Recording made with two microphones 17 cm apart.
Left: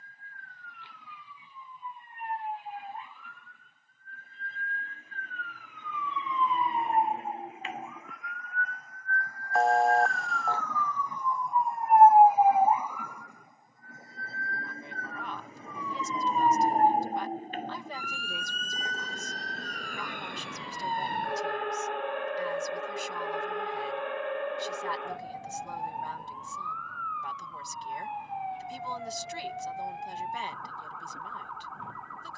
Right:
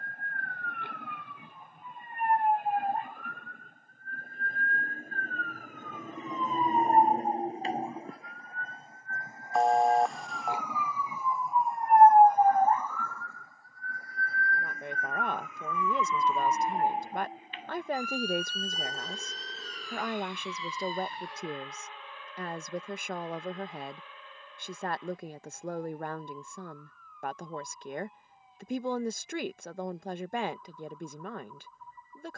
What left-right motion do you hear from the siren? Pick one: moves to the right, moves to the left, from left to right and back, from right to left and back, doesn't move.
moves to the left.